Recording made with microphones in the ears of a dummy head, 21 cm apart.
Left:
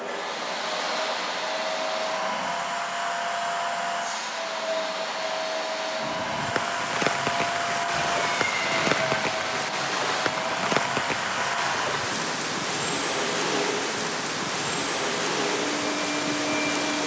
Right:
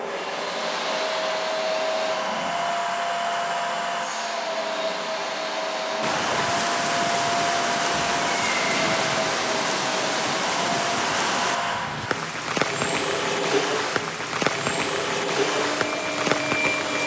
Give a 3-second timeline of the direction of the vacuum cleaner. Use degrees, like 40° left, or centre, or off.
40° left, 40° left, 10° left, 10° right, 20° right, 20° right.